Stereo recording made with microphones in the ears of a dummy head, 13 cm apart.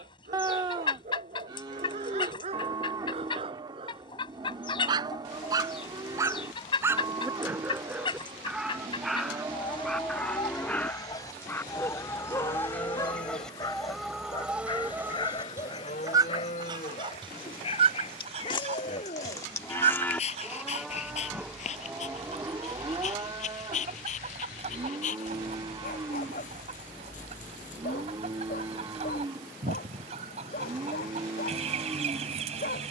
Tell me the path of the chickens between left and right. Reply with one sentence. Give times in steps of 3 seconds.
You can hear the chickens on the left from 0 s, in the centre from 12 s and on the right from 15 s.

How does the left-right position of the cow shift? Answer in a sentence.
In this clip you hear the cow move from right to left and back again.